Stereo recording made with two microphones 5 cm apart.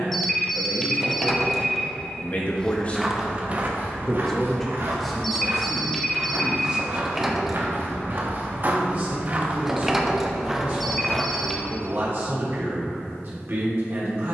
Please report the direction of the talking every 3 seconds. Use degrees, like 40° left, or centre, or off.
40° left, 10° left, 20° right, 40° right, 50° right.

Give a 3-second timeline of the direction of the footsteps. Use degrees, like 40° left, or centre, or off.
10° left, 50° right, 50° right, 10° right, off.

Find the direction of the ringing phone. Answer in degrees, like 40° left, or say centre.
centre.